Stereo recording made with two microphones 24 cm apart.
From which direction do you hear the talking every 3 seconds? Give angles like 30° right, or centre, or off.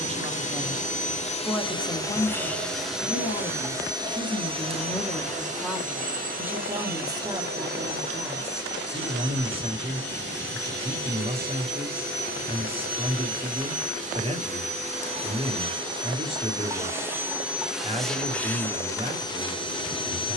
centre, 20° left, 20° right, 20° right, 20° right, 20° right, 20° right.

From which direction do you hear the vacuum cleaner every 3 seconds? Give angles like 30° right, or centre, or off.
20° left, 20° right, 40° right, 40° right, 30° right, 10° right, 10° left.